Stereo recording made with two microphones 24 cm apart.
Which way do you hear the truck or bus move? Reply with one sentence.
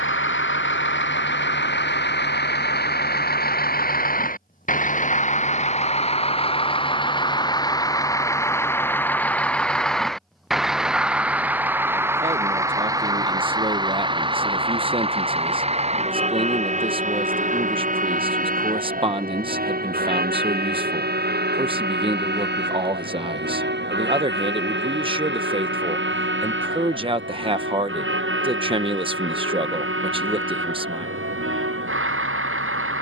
You can hear the truck or bus go from the left side to the right.